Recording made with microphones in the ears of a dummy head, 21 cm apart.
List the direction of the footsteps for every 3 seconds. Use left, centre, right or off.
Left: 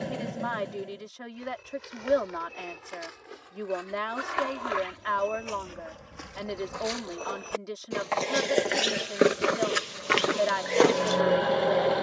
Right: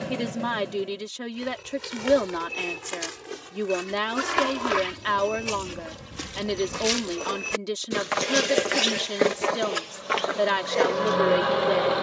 right, right, right, left.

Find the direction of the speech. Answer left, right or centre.
right.